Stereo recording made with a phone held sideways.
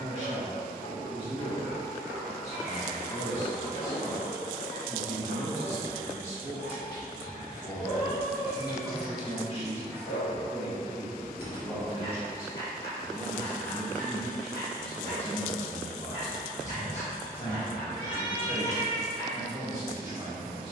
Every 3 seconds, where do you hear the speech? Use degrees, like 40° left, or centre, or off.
40° right, 40° right, 40° right, 30° right, 10° left, 40° left, 10° right.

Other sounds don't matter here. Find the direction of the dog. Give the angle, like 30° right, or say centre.
80° left.